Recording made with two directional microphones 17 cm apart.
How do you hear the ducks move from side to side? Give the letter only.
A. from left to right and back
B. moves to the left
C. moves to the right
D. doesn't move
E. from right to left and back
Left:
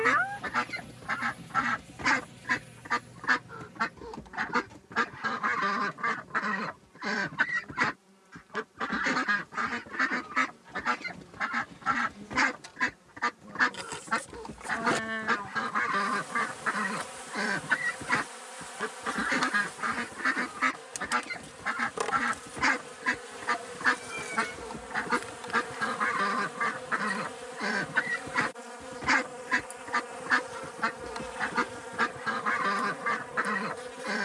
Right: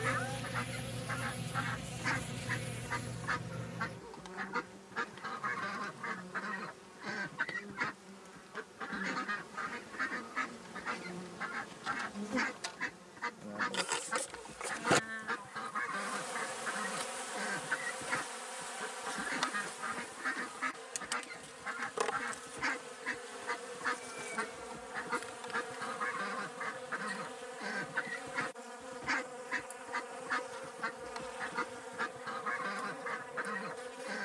D.